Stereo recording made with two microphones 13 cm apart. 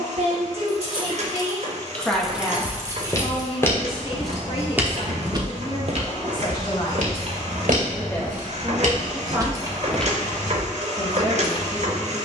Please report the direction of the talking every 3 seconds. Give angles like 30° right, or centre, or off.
20° right, 40° left, 20° left, 30° right.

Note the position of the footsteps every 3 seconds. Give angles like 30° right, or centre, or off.
30° left, 10° right, 70° right, 10° right.